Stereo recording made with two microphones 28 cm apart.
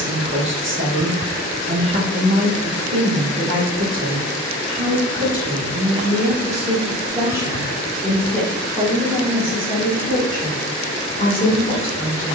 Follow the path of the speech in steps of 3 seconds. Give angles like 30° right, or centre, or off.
40° right, 40° right, 10° right, 20° left.